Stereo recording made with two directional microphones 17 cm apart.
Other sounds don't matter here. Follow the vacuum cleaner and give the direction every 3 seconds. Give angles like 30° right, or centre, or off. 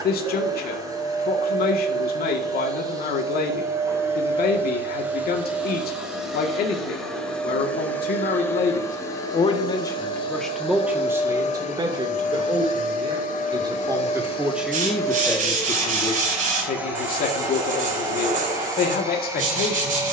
20° right, 10° right, 10° left, 30° left, 40° left, centre, 20° right.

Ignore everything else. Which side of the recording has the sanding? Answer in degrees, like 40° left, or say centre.
50° right.